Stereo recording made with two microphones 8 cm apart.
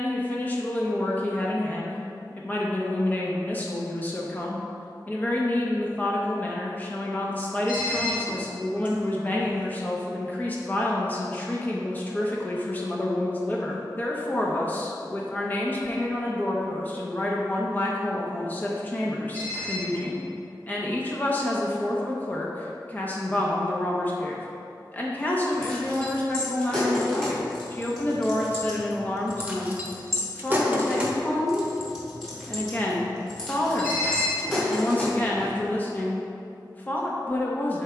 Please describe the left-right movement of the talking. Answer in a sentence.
You can hear the talking stay in one place.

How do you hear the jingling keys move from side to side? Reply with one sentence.
In this clip you hear the jingling keys go right and come back.